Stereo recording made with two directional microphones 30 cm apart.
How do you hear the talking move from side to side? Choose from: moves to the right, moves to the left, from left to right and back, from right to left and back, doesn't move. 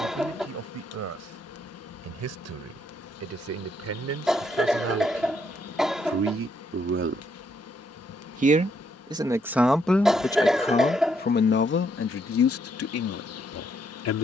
moves to the left.